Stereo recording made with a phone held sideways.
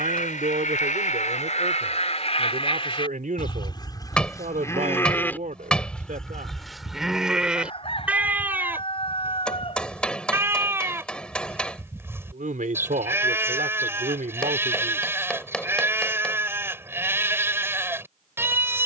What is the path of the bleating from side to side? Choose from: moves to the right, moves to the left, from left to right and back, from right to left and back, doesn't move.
moves to the right.